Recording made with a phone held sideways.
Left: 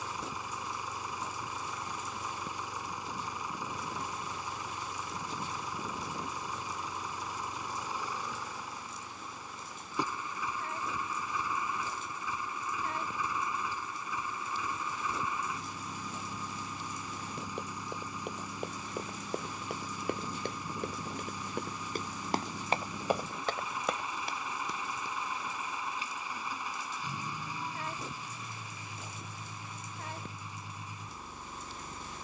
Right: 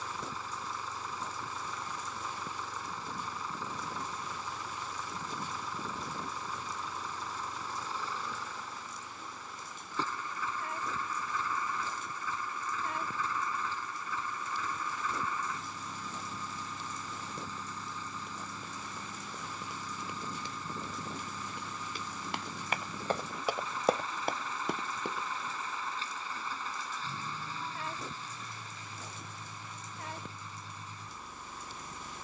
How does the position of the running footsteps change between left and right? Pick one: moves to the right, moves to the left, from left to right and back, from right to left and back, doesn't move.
moves to the right.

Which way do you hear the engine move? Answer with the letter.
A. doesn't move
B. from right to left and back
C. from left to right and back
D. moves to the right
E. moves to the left
A.